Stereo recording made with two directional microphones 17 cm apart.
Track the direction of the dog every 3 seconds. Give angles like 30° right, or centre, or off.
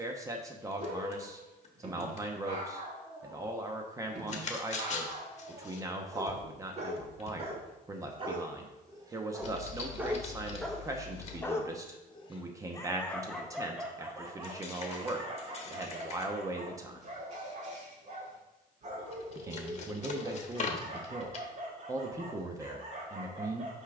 50° right, 50° right, 30° right, centre, centre, 40° right, 40° right, 40° right.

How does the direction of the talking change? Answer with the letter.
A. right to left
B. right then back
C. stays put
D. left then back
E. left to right
C.